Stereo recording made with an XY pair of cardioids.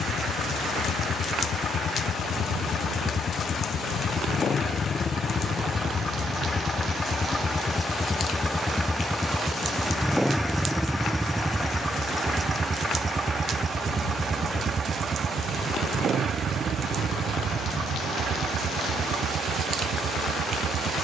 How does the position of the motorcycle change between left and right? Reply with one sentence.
You can hear the motorcycle go from the left side to the right.